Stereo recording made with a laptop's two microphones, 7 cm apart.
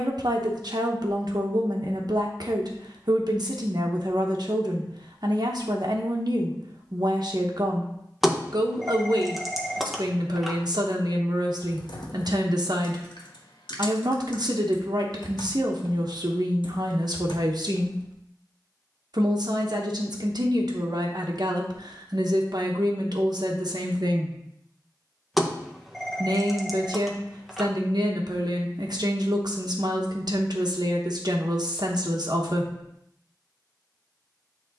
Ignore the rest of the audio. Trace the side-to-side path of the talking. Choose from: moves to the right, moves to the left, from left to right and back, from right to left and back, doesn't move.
doesn't move.